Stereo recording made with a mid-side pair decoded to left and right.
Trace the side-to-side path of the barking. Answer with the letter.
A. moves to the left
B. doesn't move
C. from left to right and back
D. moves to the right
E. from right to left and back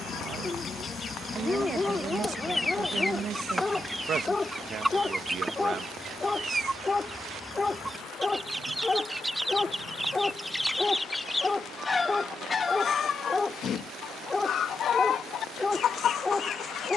B.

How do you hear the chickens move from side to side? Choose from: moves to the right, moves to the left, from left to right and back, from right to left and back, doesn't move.
from left to right and back.